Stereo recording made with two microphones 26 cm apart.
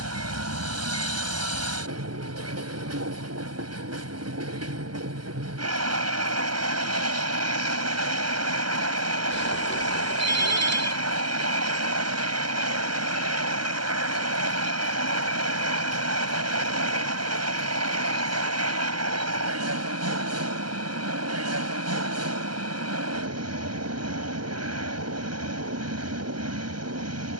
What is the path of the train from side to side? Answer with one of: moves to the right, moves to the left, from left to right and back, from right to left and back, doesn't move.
doesn't move.